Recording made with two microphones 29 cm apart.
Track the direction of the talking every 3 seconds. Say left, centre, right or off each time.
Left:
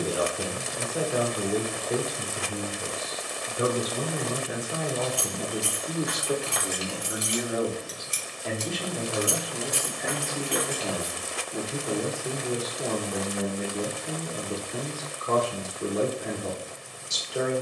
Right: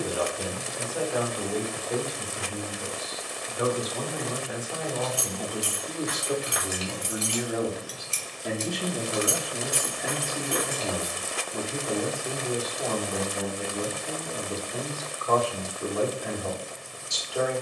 left, left, centre, centre, left, left.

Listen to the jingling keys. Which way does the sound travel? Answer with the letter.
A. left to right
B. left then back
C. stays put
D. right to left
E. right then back
B.